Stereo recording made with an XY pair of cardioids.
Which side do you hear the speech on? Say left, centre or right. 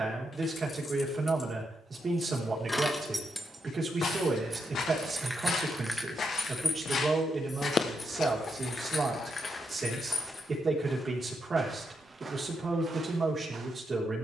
right.